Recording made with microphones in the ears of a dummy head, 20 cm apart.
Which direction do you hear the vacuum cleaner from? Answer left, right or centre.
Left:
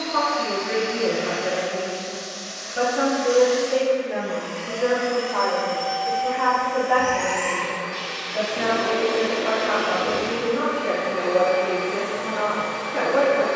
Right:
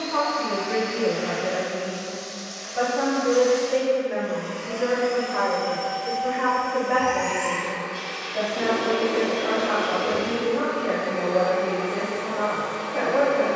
left.